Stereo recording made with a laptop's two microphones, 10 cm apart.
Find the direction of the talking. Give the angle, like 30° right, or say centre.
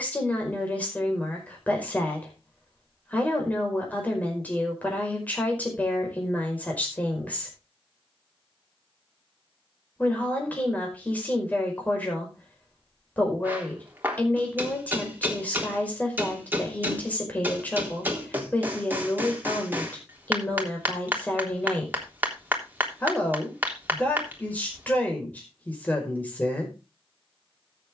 10° left.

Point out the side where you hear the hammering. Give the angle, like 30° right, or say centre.
20° right.